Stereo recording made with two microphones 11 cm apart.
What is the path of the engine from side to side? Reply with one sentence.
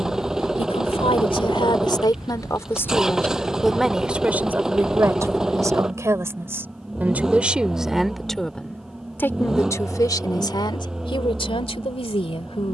You can hear the engine stay put.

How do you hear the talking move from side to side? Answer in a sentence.
You can hear the talking move from left to right and back again.